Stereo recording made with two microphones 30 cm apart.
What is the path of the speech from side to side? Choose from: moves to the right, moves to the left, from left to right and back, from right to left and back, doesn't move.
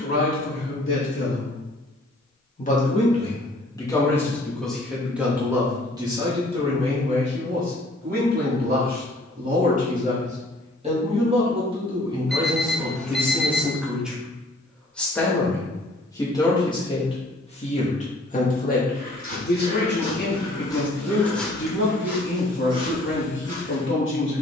from left to right and back.